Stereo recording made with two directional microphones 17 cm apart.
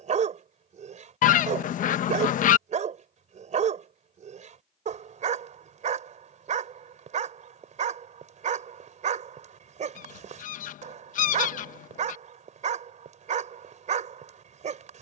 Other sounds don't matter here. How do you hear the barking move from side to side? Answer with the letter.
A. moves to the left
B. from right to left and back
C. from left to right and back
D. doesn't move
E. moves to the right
D.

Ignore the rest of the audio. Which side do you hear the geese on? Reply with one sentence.
You can hear the geese on the left.